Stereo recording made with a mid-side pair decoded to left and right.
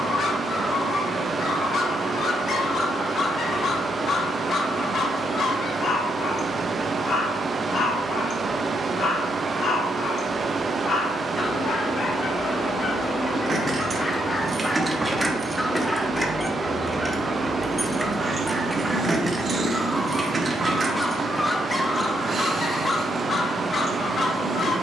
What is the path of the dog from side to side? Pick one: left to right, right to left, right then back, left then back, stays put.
right then back.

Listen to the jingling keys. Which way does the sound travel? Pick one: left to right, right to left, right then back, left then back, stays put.
left then back.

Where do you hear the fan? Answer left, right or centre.
right.